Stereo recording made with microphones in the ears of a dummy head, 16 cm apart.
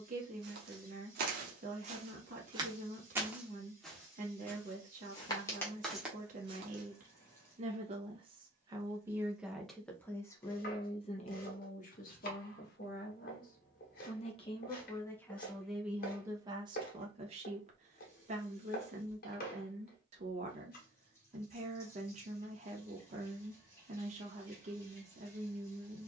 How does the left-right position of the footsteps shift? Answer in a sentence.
You can hear the footsteps move from right to left and back again.